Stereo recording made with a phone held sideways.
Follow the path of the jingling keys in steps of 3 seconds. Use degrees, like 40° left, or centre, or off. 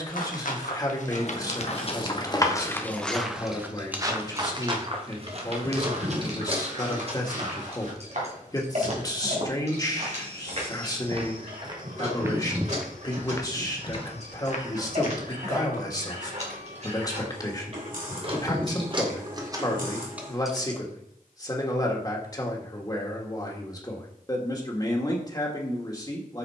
30° left, 20° right, 50° right, 50° right, 60° right, 50° right, 20° right, off, off.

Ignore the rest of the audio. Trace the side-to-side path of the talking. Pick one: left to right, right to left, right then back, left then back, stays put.
stays put.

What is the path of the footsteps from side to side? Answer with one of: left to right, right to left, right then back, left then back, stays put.
right then back.